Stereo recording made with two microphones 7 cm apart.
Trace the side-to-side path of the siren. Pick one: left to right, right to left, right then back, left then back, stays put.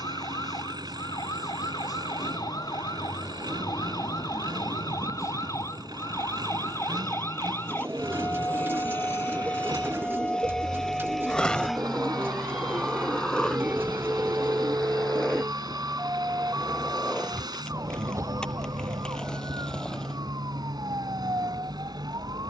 left to right.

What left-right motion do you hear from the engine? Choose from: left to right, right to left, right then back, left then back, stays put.
stays put.